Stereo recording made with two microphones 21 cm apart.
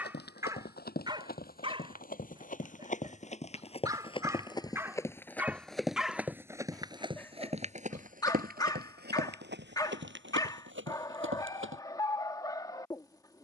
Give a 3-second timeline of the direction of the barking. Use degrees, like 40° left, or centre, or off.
20° right, 10° right, 10° left, 20° left, 20° left.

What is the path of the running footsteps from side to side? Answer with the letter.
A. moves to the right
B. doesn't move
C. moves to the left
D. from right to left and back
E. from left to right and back
A.